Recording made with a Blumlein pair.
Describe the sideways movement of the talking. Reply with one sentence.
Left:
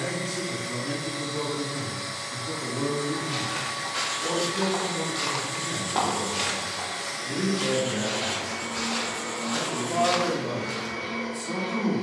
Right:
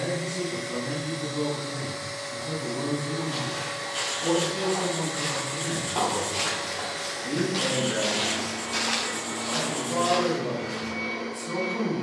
In this clip you hear the talking move from left to right and back again.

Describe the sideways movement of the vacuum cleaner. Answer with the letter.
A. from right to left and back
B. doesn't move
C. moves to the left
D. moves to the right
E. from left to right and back
B.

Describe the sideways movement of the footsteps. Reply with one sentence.
You can hear the footsteps move from left to right and back again.